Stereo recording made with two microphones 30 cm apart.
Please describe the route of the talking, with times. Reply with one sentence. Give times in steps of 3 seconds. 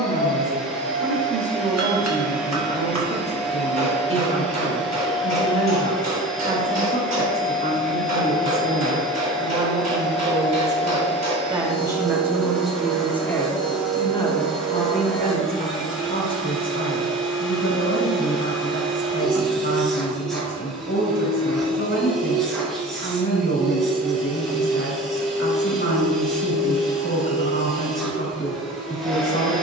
You can hear the talking on the right from 0 s, in the centre from 12 s and on the left from 15 s.